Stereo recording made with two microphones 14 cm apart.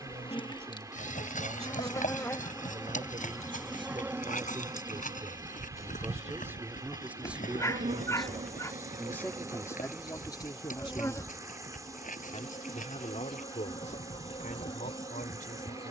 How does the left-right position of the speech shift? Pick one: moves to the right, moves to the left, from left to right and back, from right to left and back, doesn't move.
moves to the left.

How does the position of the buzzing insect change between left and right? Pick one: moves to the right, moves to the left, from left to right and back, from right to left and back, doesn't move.
from left to right and back.